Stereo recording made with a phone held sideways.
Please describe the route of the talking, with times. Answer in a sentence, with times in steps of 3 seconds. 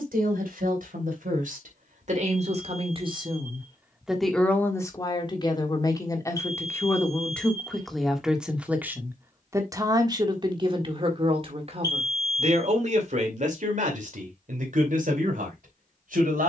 In this clip you hear the talking on the right from 0 s, in the centre from 3 s and on the right from 9 s.